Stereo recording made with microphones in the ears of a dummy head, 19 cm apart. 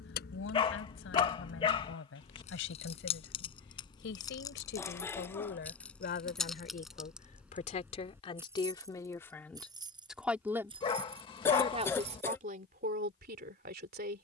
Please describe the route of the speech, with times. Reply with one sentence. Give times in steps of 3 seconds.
In this clip you hear the speech on the left from 0 s, in the centre from 9 s and on the right from 12 s.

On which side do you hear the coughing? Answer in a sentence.
In this clip you hear the coughing in the centre.